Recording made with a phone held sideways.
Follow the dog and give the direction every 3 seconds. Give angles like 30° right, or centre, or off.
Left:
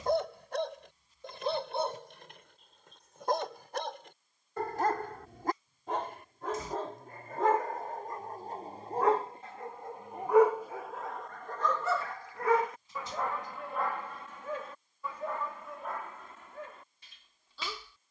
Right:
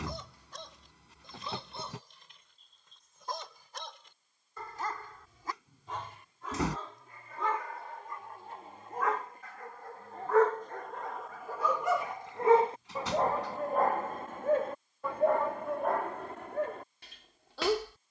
70° left, 60° left, 40° left, 10° left, 40° right, 60° right.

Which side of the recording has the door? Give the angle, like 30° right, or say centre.
80° right.